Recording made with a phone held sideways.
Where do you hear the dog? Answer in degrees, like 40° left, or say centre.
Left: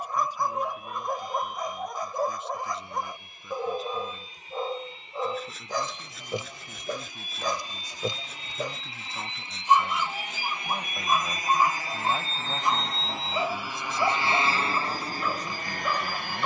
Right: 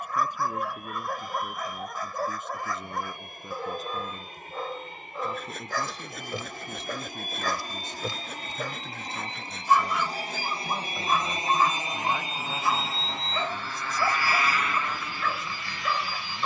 20° left.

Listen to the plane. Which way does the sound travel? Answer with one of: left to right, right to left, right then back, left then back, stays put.
right to left.